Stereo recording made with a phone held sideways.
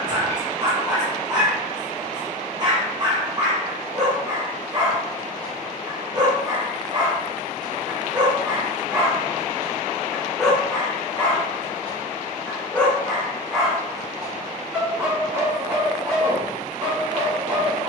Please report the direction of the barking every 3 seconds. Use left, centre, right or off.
right, right, right, centre, centre, right.